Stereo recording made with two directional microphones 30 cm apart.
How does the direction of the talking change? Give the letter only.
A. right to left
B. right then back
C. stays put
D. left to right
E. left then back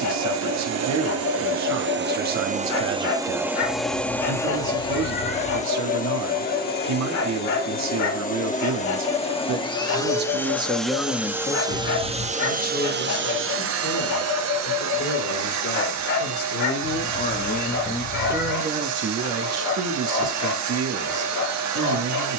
E.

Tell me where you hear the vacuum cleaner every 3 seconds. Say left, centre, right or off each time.
right, centre, left, centre, right, right, right, right.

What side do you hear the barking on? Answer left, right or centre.
left.